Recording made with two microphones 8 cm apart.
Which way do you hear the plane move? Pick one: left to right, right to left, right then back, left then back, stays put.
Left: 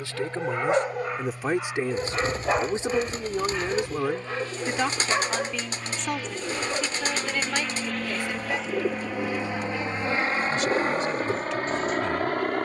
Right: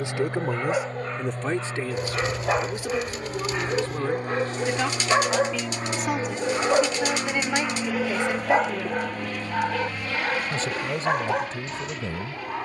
right to left.